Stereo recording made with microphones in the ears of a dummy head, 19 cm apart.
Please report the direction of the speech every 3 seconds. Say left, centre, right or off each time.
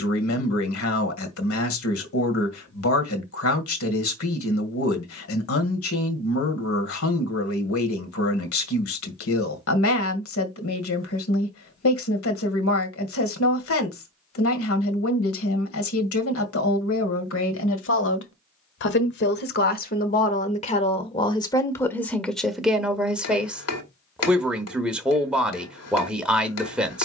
left, left, left, left, left, left, left, centre, centre.